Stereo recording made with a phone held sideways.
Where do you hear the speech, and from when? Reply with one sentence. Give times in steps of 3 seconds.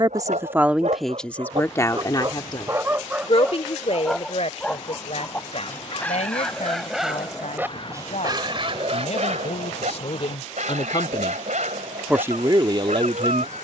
You can hear the speech in the centre from 0 s, on the left from 3 s and on the right from 12 s.